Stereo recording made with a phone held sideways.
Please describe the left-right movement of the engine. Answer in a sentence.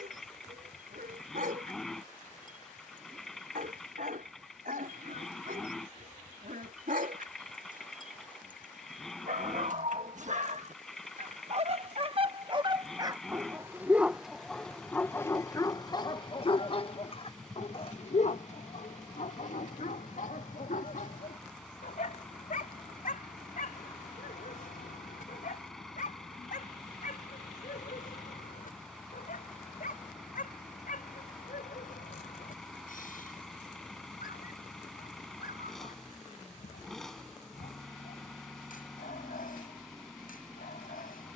In this clip you hear the engine stay put.